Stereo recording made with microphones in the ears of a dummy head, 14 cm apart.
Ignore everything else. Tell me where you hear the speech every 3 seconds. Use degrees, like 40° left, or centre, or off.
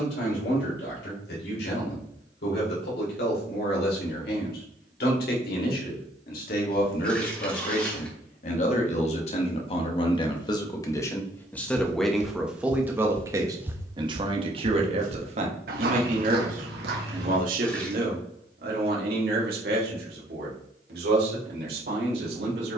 70° left, 70° left, 50° left, 30° left, 20° right, 50° right, 60° right, 70° right.